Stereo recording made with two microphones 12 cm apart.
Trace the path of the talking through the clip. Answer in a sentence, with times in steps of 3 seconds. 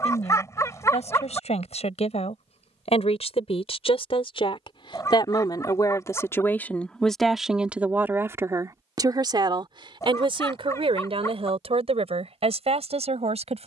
In this clip you hear the talking on the left from 0 s, in the centre from 6 s and on the right from 9 s.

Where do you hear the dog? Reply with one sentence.
You can hear the dog on the left.